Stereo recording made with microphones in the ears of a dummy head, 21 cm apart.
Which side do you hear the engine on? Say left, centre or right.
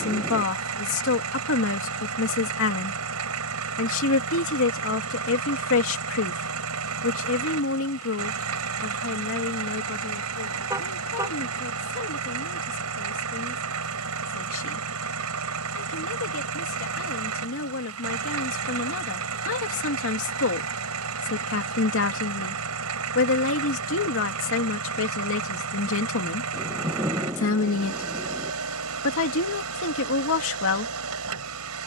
right.